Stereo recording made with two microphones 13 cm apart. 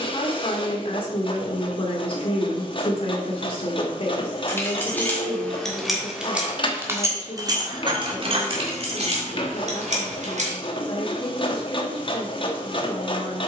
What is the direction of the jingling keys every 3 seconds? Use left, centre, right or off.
off, centre, right, right, off.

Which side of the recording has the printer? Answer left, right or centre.
left.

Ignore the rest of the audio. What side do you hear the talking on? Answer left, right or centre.
left.